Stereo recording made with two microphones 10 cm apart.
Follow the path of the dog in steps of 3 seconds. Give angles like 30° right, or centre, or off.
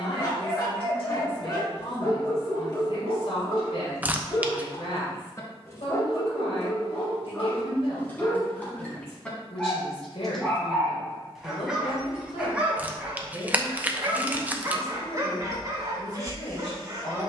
40° left, 30° left, 20° left, centre, 20° right, 40° right.